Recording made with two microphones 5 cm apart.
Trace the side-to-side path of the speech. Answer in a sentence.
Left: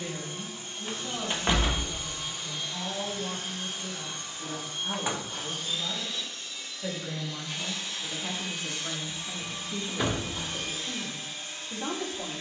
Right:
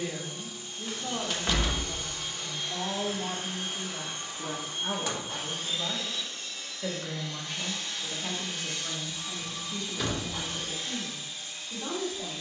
In this clip you hear the speech move from right to left.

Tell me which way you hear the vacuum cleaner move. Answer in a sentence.
In this clip you hear the vacuum cleaner go right and come back.